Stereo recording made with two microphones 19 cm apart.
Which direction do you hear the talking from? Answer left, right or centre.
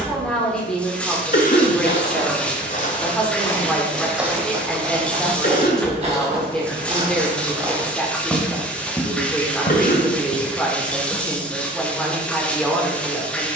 centre.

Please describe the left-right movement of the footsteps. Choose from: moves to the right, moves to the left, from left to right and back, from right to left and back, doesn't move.
from left to right and back.